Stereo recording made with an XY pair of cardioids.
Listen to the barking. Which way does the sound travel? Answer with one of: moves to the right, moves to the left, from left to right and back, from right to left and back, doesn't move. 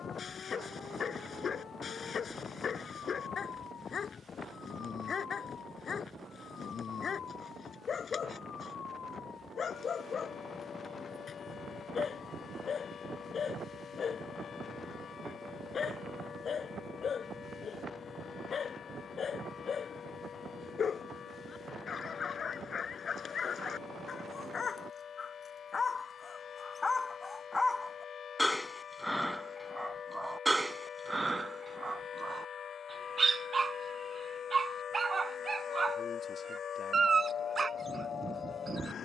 moves to the right.